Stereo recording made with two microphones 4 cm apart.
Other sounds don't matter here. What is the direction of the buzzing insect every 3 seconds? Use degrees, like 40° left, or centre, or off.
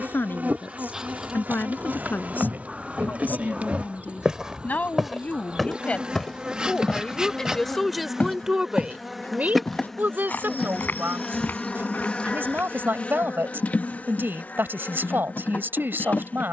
40° right, 30° right, 20° right, 10° left, 40° left, 40° left.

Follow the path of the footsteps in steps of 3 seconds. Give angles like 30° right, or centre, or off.
50° right, 20° right, 30° left, 50° left, 50° left, off.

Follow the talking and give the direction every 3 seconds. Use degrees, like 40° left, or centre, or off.
50° left, 40° left, centre, 50° right, 60° right, 60° right.